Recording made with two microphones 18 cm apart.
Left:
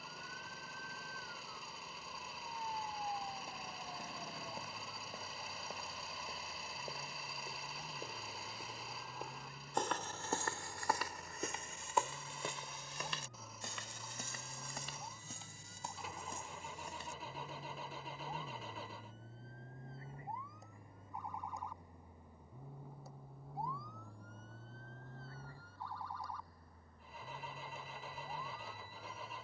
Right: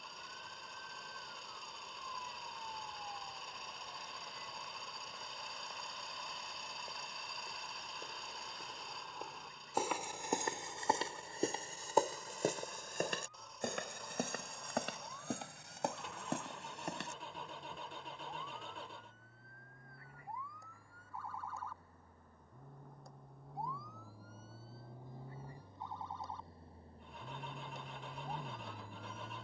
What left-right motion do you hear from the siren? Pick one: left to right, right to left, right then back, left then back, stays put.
left to right.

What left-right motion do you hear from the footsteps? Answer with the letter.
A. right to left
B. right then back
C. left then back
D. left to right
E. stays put
D.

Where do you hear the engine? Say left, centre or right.
centre.